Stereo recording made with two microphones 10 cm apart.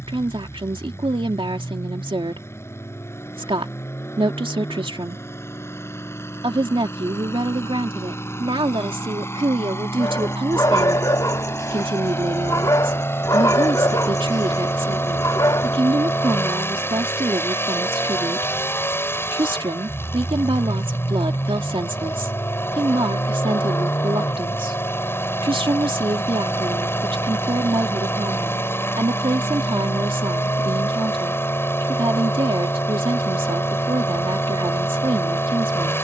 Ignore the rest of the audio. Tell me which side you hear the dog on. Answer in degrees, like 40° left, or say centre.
40° left.